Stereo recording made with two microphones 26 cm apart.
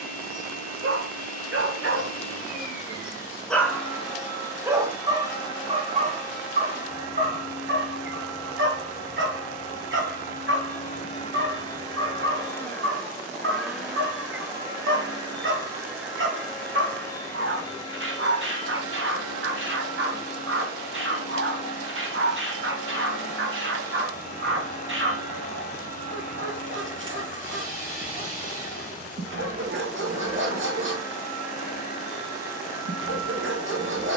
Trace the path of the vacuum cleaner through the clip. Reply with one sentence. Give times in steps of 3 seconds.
You can hear the vacuum cleaner on the left from 0 s, in the centre from 12 s and on the left from 18 s.